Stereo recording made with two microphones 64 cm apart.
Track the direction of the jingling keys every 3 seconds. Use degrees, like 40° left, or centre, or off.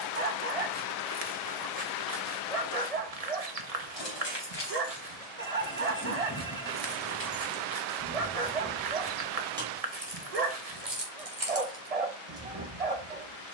off, 40° left, 10° left, 30° right, 60° right.